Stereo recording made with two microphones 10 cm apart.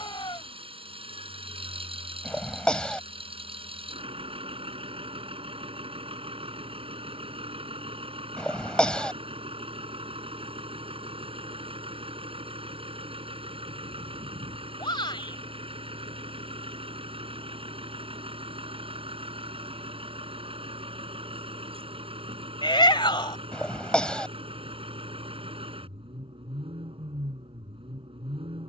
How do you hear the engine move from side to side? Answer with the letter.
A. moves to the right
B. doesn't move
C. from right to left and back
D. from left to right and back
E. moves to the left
B.